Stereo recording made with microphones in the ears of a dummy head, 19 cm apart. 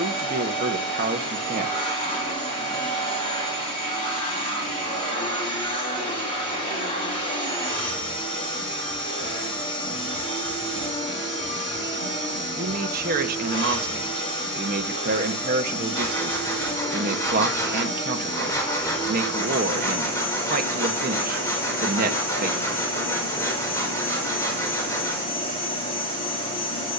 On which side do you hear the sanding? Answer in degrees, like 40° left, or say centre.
10° left.